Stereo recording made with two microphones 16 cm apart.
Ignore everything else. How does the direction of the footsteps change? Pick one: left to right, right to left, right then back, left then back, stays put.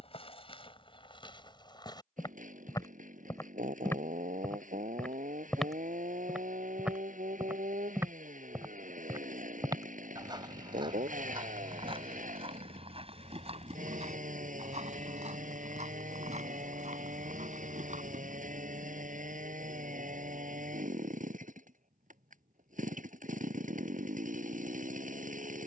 left to right.